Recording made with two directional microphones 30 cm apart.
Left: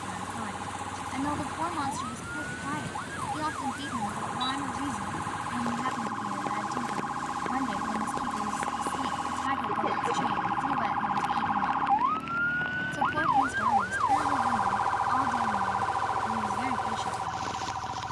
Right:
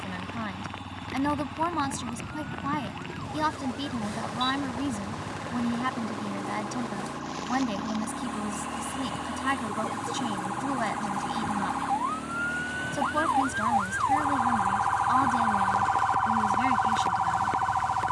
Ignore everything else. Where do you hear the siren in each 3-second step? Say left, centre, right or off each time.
left, left, left, left, centre, right.